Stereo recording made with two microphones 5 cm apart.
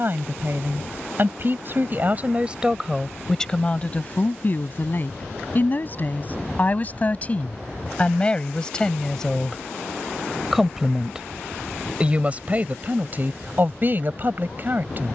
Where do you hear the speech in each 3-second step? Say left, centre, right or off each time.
right, left, left, centre, right.